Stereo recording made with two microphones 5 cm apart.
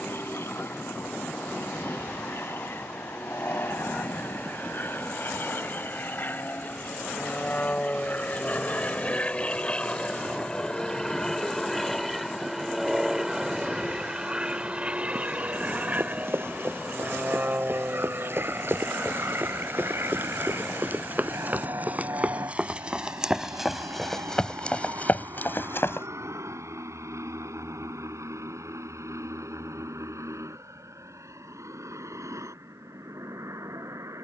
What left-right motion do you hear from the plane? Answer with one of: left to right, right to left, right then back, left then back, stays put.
left to right.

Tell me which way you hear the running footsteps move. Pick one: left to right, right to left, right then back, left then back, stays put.
right to left.